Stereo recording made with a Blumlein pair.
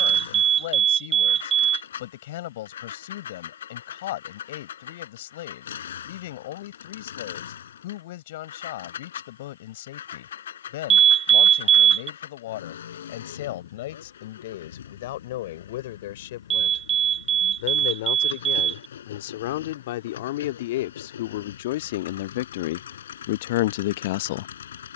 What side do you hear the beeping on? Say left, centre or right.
right.